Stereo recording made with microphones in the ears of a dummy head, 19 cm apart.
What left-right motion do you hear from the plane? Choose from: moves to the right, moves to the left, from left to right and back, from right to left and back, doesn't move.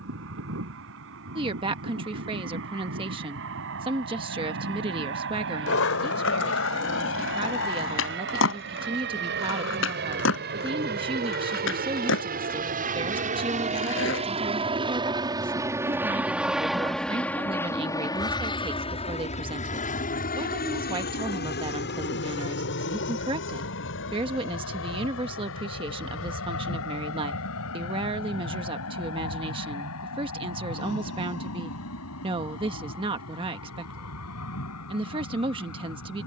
moves to the left.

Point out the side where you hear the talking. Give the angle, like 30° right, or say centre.
20° right.